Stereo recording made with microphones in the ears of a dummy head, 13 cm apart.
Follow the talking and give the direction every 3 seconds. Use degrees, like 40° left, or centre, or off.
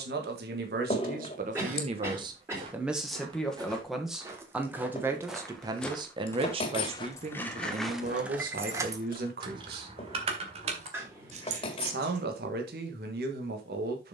50° right, 10° right, 50° right, 70° right, 70° right.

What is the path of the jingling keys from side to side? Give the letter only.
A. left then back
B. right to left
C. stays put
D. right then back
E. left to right
E.